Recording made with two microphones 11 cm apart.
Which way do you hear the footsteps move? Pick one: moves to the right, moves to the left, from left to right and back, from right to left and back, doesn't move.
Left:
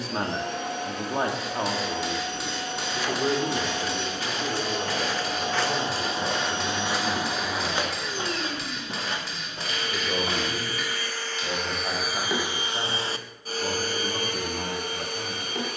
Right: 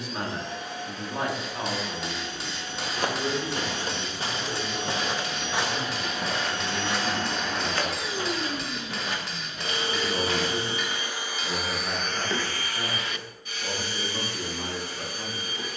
moves to the left.